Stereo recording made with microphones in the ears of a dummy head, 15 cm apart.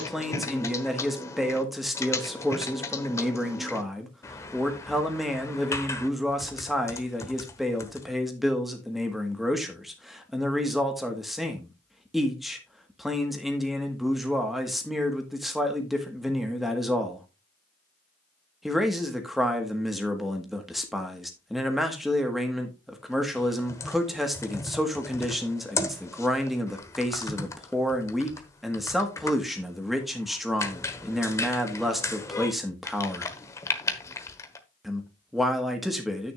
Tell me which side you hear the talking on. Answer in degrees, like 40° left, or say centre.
centre.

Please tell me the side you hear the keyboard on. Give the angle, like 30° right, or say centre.
20° left.